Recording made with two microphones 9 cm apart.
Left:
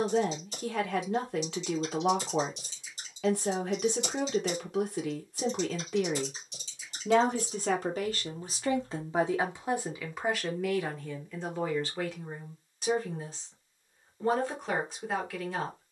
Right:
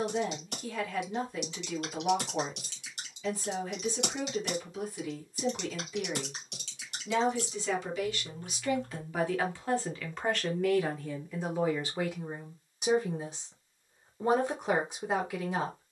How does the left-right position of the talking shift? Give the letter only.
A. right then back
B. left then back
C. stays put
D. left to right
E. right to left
D.